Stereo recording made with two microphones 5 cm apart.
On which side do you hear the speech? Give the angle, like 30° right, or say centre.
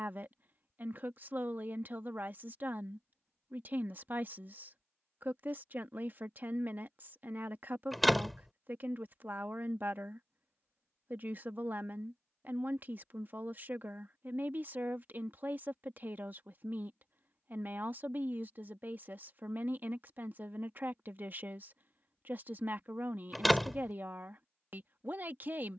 40° right.